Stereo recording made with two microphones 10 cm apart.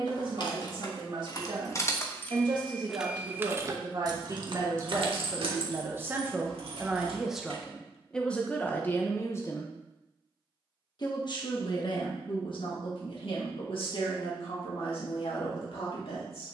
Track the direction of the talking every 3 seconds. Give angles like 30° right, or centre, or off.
50° right, 40° right, centre, 40° left, 60° left, 70° left.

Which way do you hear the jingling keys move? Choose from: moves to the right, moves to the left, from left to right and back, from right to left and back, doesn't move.
moves to the right.